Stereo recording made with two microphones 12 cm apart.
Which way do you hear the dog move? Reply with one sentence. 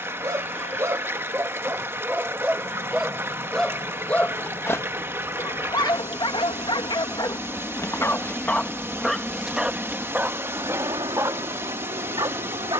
In this clip you hear the dog go left and come back.